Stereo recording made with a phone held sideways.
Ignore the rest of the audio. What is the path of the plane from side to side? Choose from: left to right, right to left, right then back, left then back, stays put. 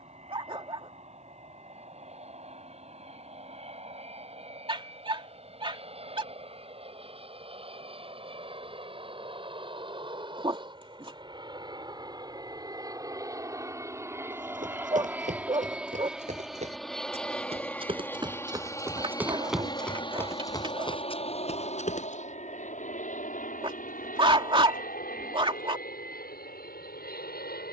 right to left.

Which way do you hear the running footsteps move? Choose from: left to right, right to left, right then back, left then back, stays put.
right to left.